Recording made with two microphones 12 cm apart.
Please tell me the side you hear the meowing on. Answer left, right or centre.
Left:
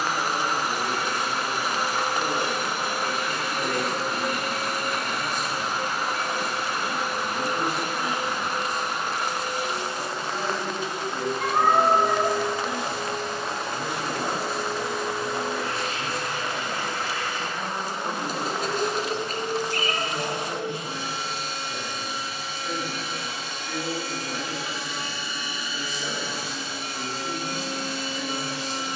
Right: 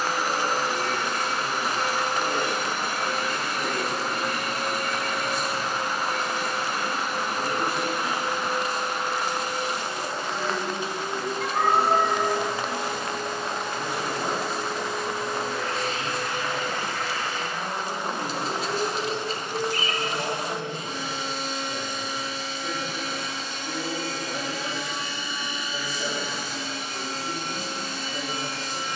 left.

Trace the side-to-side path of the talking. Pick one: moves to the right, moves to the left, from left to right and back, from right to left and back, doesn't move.
moves to the right.